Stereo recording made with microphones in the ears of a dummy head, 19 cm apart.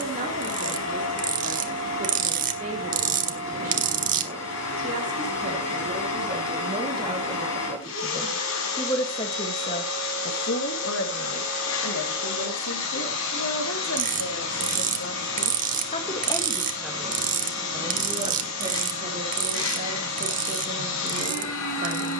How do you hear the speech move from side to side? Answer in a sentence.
You can hear the speech go left and come back.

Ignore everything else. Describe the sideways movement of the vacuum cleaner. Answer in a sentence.
In this clip you hear the vacuum cleaner stay in one place.